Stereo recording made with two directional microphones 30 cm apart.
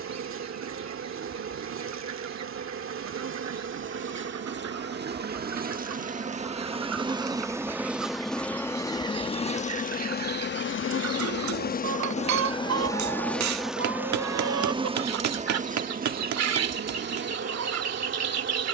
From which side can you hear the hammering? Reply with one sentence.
In this clip you hear the hammering on the right.